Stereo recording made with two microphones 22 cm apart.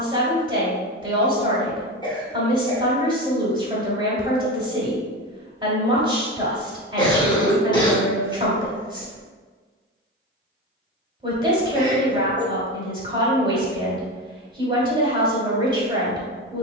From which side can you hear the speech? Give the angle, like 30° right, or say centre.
20° right.